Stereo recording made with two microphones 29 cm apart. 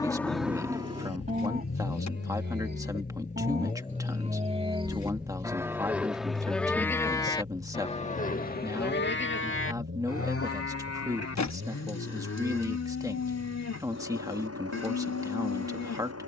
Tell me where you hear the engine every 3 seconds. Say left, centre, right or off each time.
left, centre, right, right, right, right.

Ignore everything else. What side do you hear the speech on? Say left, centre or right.
centre.